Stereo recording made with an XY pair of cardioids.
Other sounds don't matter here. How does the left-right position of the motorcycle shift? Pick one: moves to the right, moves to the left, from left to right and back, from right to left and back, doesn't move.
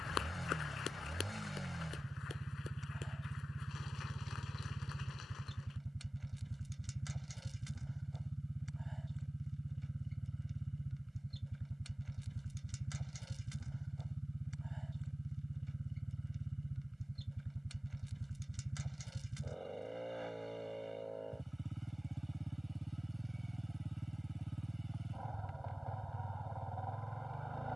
doesn't move.